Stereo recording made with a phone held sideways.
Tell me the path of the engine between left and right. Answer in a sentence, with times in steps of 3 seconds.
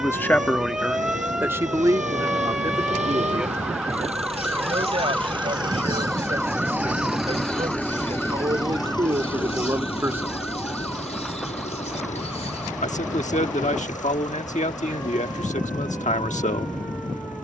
In this clip you hear the engine on the right from 0 s, in the centre from 6 s and on the left from 9 s.